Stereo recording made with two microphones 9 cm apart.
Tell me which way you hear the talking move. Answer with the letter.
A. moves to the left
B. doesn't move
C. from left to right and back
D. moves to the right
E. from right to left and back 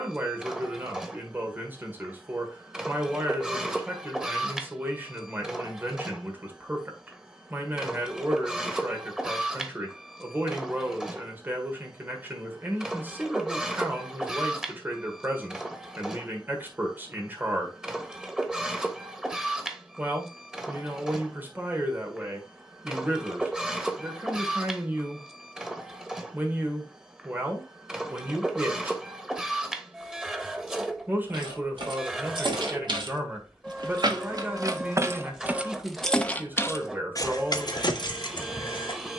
B.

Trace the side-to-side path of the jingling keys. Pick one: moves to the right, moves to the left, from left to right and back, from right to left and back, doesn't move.
moves to the left.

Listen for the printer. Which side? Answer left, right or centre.
centre.